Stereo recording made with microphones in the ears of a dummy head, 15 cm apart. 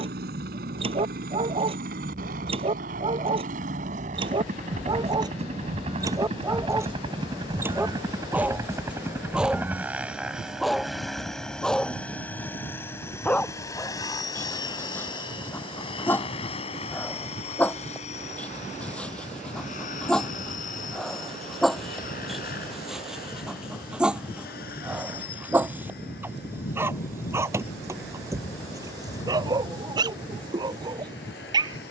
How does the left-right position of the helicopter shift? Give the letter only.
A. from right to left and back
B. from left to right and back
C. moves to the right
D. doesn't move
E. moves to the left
E.